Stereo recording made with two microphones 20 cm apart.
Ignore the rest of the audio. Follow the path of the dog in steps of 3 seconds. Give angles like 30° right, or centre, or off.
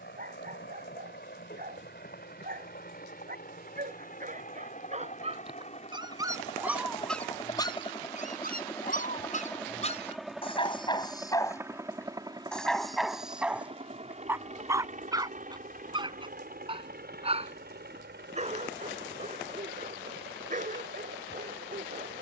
50° right, 40° right, 10° left, 30° left, 10° right, 20° right, 40° right, 40° right.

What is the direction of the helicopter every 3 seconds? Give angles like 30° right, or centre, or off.
50° left, 40° left, 20° left, centre, 30° right, 40° right, 60° right, 60° right.